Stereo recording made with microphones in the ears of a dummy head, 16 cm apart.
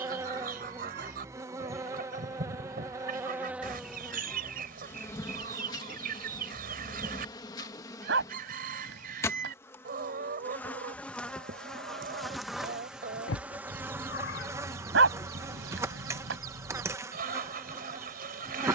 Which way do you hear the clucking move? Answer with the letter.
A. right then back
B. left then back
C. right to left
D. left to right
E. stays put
E.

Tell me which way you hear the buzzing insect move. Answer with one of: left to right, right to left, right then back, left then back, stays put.
left then back.